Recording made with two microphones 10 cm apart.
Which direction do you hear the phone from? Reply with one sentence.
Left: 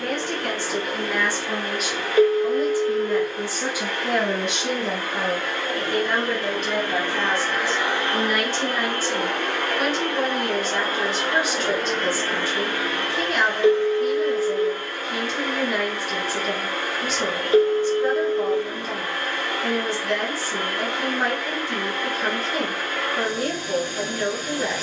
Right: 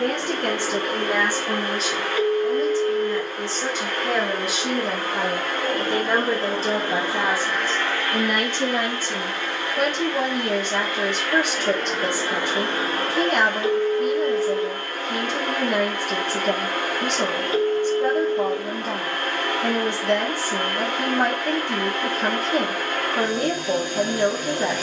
In this clip you hear the phone on the left.